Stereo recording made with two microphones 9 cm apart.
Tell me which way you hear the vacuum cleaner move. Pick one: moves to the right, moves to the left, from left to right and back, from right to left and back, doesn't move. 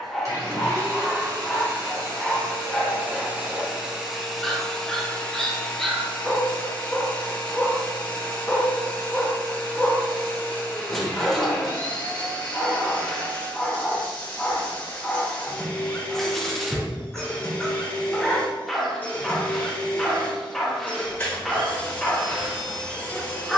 moves to the left.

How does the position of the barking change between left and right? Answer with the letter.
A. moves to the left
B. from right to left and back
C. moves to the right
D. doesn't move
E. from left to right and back
D.